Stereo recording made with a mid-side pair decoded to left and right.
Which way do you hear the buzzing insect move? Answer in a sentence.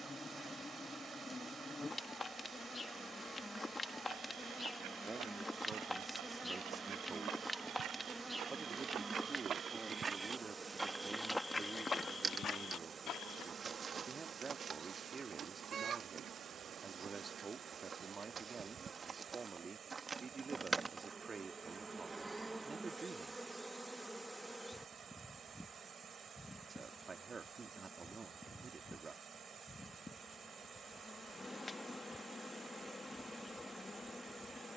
You can hear the buzzing insect move from left to right and back again.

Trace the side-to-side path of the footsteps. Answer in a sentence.
You can hear the footsteps go from the right side to the left.